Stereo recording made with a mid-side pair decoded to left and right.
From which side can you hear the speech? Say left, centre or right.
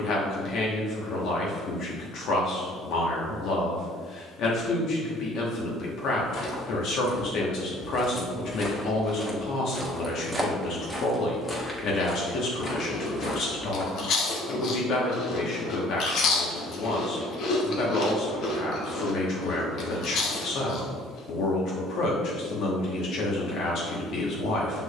left.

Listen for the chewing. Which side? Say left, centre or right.
left.